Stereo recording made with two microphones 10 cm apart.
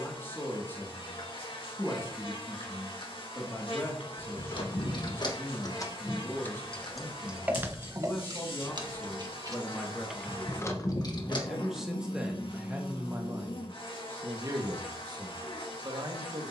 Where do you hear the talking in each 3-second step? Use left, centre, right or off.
left, left, left, centre, right, right.